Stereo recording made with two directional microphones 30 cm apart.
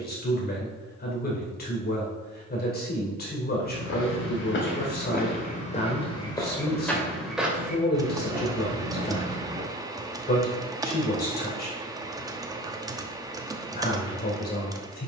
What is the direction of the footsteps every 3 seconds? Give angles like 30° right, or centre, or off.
off, 40° left, centre, 20° right, off.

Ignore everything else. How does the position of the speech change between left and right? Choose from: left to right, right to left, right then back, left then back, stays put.
stays put.